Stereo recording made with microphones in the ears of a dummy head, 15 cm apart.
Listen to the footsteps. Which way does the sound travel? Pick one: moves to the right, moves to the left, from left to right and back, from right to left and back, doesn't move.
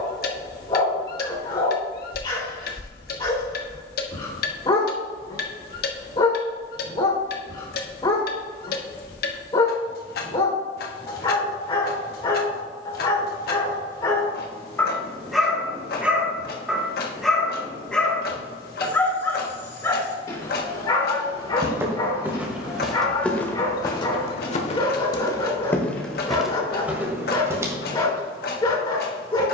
from right to left and back.